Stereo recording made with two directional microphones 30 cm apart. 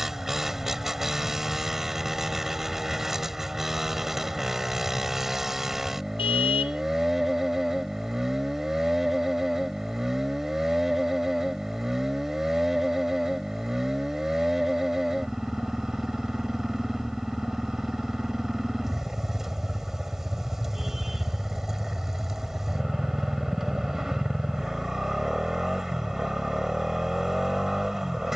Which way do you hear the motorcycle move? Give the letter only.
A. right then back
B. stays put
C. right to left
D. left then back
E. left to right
B.